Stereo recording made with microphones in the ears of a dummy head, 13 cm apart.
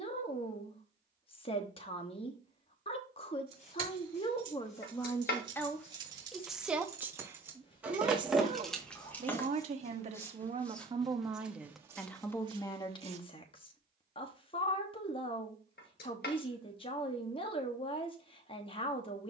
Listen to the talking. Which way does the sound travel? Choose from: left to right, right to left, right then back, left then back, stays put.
right then back.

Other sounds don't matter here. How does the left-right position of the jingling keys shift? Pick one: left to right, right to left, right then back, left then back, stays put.
right to left.